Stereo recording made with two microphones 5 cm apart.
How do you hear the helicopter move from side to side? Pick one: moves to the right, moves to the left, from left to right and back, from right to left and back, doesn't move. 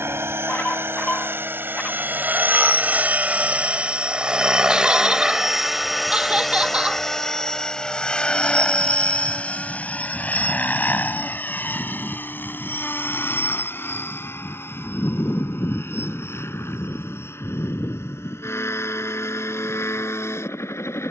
moves to the left.